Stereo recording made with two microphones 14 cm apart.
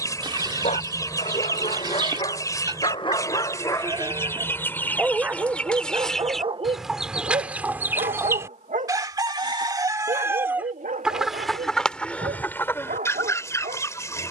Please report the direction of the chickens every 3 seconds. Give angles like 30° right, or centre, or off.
20° left, 20° left, 10° right, 10° right, 20° left.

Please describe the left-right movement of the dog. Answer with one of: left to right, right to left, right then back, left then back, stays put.
left to right.